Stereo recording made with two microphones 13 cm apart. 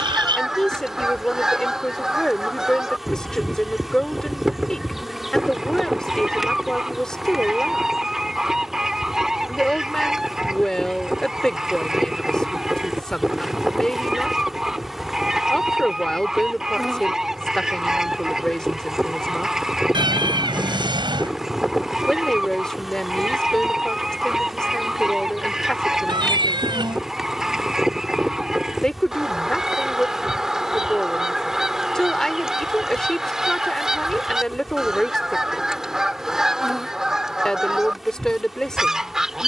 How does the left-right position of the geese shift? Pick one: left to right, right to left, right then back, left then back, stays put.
stays put.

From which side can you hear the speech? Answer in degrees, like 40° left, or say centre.
centre.